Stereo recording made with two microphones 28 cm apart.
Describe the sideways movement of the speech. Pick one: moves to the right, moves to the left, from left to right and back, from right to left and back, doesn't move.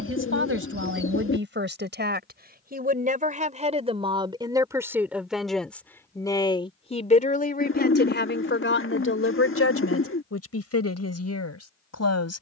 moves to the left.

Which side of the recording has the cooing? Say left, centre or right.
left.